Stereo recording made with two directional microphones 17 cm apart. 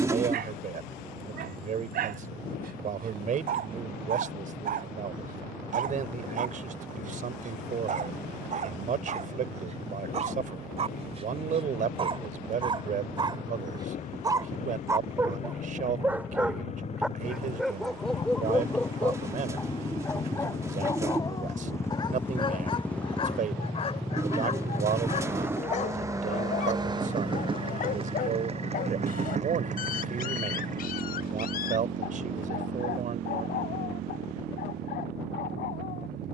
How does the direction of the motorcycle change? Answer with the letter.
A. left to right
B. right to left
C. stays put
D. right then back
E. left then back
A.